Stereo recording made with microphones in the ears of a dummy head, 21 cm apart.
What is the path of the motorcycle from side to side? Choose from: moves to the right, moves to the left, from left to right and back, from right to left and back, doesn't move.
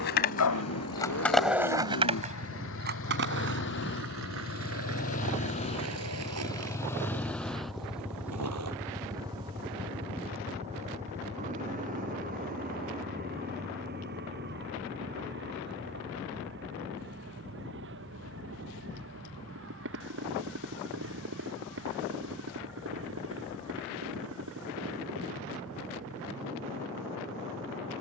moves to the right.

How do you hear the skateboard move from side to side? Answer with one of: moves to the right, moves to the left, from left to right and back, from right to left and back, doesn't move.
moves to the right.